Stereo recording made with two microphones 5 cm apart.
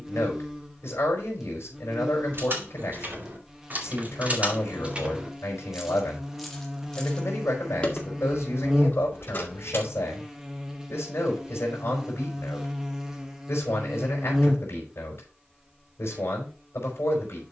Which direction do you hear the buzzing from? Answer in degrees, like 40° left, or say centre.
10° right.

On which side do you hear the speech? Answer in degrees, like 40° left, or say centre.
60° left.